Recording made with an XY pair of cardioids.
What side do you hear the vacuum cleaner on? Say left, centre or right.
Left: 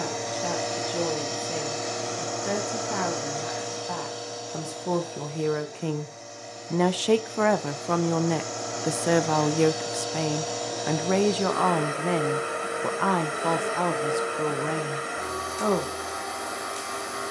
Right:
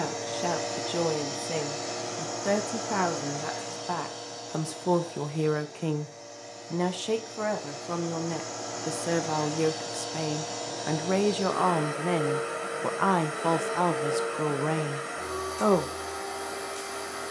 left.